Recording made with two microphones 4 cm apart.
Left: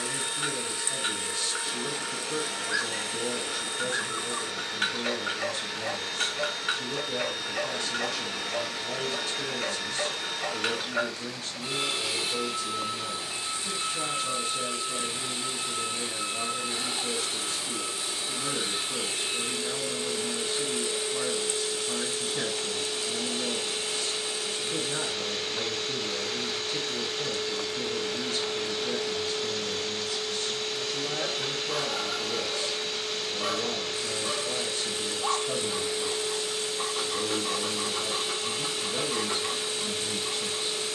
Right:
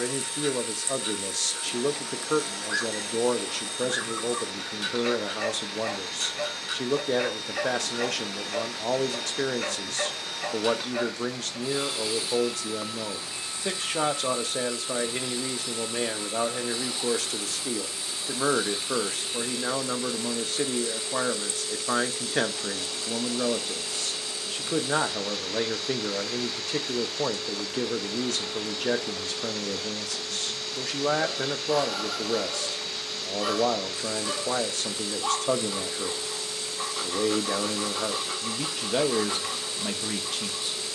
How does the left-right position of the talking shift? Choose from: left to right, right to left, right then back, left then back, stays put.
stays put.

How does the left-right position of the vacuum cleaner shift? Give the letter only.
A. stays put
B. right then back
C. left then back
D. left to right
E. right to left
A.